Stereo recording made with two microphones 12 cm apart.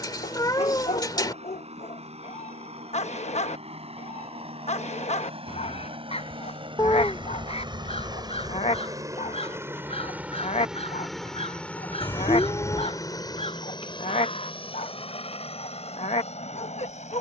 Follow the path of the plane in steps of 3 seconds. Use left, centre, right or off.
right, right, right, centre, left, left.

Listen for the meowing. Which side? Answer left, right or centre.
left.